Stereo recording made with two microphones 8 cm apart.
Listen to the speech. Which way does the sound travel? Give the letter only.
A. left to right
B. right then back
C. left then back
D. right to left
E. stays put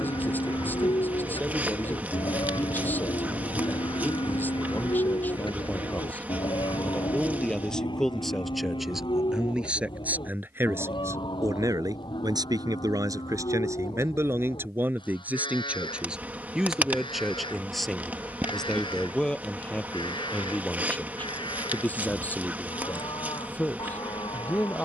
B.